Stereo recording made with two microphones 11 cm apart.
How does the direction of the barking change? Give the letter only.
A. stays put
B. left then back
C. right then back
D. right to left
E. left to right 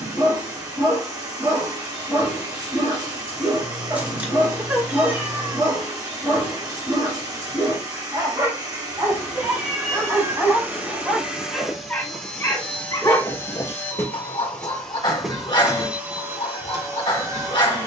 D.